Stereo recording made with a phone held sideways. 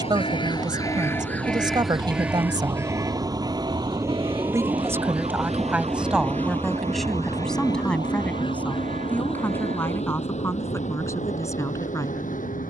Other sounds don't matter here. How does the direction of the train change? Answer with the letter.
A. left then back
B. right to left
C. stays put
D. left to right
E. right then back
B.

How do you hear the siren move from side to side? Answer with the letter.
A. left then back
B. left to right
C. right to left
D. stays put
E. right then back
B.